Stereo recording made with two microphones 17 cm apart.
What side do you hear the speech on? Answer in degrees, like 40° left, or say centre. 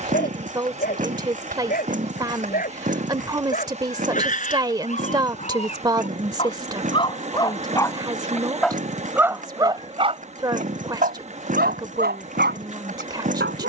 20° right.